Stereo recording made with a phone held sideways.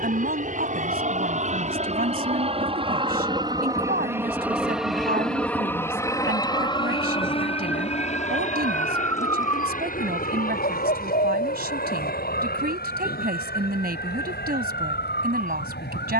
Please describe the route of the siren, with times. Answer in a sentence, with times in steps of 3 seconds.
In this clip you hear the siren on the right from 0 s, in the centre from 6 s and on the left from 9 s.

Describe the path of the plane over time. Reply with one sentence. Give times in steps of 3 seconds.
In this clip you hear the plane on the right from 0 s, in the centre from 3 s and on the left from 6 s.